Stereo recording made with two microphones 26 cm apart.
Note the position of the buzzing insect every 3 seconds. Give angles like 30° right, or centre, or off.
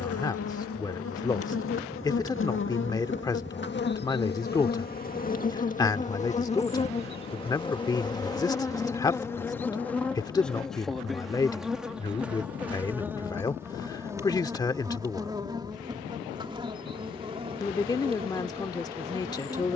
50° left, 40° left, 20° left, centre, 10° right, 20° right, 20° right.